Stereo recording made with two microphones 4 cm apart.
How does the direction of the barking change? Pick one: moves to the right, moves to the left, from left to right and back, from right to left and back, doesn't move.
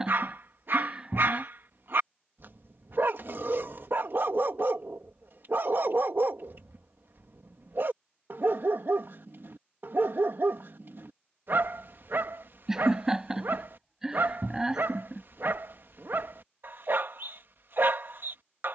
doesn't move.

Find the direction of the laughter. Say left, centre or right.
centre.